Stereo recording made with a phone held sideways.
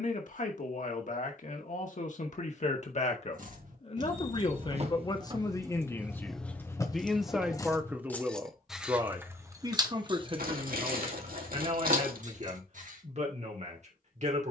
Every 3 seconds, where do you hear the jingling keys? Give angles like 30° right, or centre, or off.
off, 40° right, 10° left, 30° right, 60° right.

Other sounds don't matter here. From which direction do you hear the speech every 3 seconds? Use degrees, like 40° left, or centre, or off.
50° left, 30° left, centre, 30° right, 50° right.